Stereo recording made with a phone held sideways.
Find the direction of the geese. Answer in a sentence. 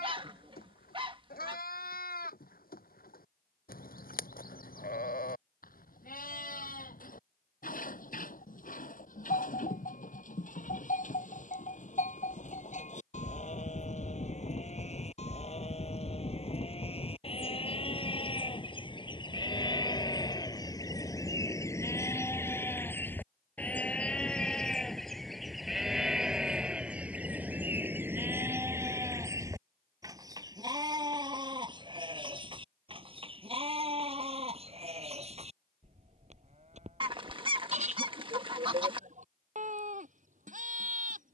In this clip you hear the geese on the right.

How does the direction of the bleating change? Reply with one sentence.
In this clip you hear the bleating travel towards the right.